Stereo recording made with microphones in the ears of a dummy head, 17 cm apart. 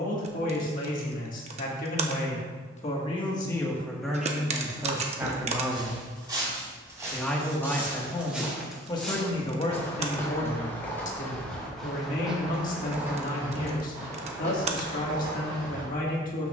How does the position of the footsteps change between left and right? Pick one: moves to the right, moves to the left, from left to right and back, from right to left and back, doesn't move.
from right to left and back.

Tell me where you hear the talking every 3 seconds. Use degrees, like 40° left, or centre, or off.
50° left, centre, 10° left, 40° left, 50° left, 50° left.